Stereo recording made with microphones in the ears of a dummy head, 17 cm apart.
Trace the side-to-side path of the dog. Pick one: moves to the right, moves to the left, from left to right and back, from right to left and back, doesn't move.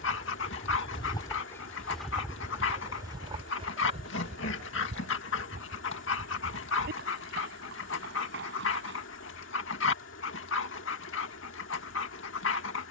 doesn't move.